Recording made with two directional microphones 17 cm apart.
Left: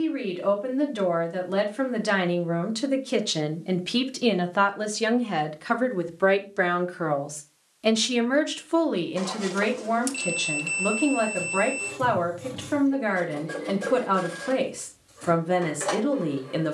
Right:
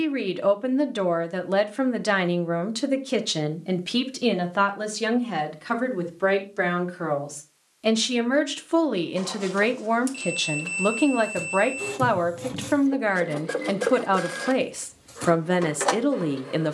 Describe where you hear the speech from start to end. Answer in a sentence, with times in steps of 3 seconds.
You can hear the speech on the right from 0 s, in the centre from 3 s and on the right from 9 s.